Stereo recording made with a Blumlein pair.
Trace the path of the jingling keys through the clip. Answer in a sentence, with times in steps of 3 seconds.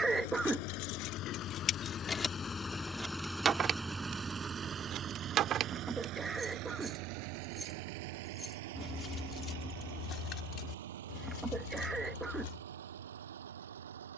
You can hear the jingling keys on the left from 0 s, on the right from 3 s, in the centre from 6 s and on the left from 9 s.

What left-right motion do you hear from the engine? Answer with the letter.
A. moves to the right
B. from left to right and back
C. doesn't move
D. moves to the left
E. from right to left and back
A.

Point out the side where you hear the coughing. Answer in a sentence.
You can hear the coughing in the centre.